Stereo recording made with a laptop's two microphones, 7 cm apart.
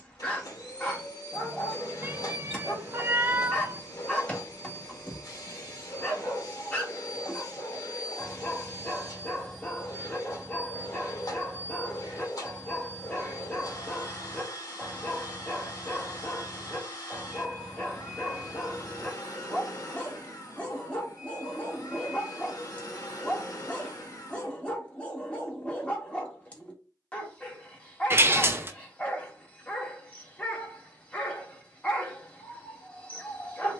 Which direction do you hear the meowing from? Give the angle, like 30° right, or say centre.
30° right.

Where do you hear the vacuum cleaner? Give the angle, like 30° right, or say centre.
50° left.